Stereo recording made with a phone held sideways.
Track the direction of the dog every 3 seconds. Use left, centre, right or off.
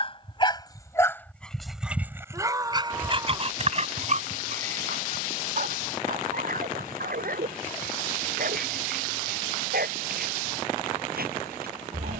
centre, right, right, right.